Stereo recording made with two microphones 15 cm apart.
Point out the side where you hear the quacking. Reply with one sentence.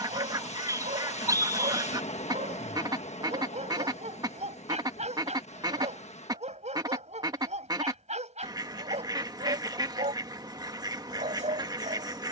You can hear the quacking on the right.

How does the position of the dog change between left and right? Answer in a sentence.
In this clip you hear the dog stay in one place.